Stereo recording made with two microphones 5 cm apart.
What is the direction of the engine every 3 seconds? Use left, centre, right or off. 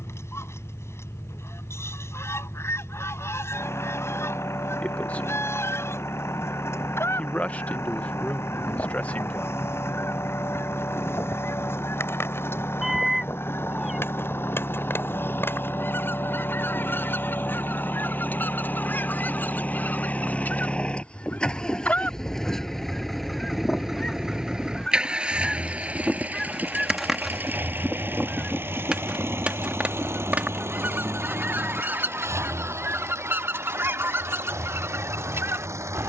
left, left, left, left, left, left, left, centre, right, right, right, right.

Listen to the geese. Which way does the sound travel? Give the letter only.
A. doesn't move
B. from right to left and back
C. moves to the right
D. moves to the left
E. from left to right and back
C.